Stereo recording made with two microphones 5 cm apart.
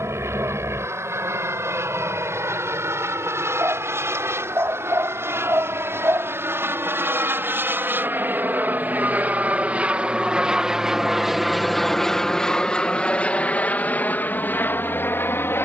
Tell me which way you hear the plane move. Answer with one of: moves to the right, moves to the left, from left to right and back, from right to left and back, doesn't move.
moves to the left.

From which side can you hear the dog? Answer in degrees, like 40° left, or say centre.
60° right.